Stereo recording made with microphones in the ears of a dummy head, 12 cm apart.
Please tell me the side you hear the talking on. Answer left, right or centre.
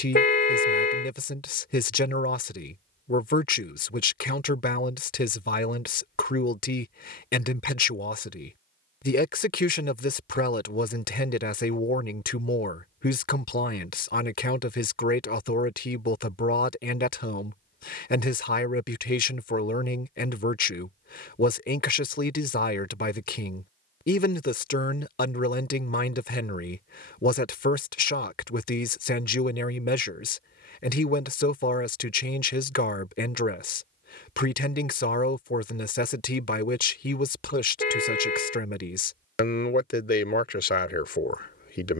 left.